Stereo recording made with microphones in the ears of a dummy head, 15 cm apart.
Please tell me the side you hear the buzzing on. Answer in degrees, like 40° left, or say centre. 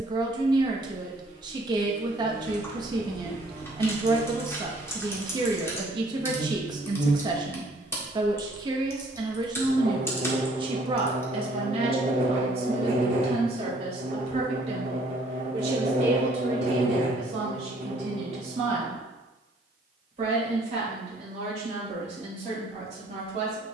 40° right.